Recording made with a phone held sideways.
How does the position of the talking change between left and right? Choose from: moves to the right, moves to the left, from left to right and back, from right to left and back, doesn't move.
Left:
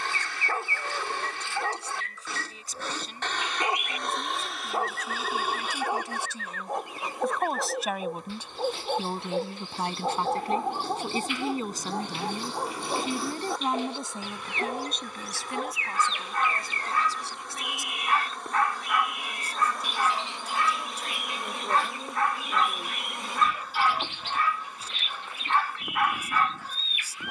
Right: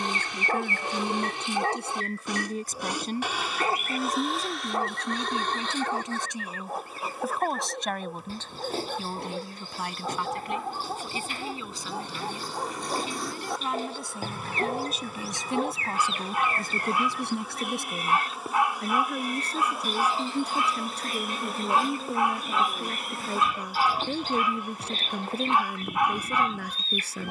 from right to left and back.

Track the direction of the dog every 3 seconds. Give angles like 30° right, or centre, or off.
20° right, centre, 20° left, 30° left, centre, 10° right, 10° right, 10° right, 10° right.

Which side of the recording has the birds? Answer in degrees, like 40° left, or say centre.
40° right.